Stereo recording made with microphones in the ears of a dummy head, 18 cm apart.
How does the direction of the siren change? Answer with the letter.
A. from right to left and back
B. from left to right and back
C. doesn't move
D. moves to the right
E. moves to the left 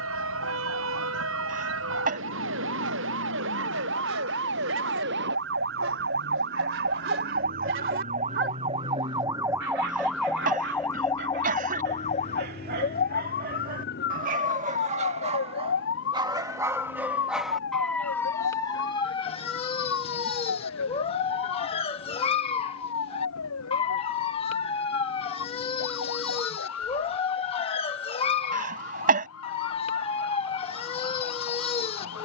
E.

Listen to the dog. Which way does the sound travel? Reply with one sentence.
In this clip you hear the dog go from the right side to the left.